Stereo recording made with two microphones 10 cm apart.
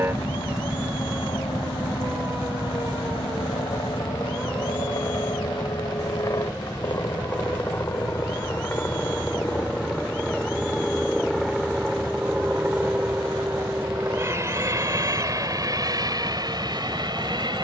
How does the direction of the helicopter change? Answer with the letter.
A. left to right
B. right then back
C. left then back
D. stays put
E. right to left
A.